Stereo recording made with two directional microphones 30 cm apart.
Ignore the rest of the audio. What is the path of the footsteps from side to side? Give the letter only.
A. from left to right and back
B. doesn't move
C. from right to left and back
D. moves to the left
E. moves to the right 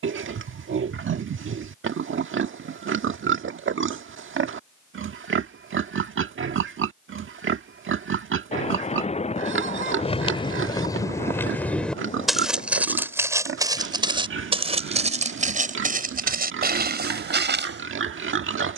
E.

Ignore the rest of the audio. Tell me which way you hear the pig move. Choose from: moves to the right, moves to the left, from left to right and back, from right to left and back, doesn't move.
doesn't move.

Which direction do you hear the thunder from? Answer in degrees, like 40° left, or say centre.
20° left.